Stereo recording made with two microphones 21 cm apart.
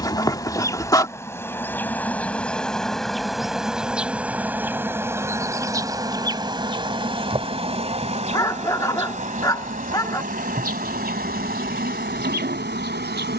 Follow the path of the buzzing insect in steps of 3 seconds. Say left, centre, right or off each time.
centre, centre, right, right, right.